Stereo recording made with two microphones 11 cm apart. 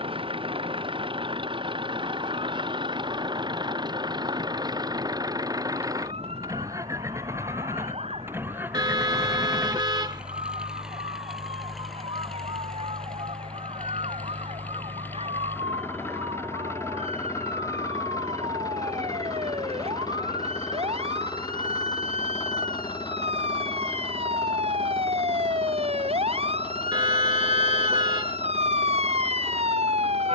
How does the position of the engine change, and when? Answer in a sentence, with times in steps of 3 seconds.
You can hear the engine on the right from 0 s, in the centre from 9 s and on the left from 15 s.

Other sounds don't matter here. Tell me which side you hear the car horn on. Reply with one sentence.
You can hear the car horn on the right.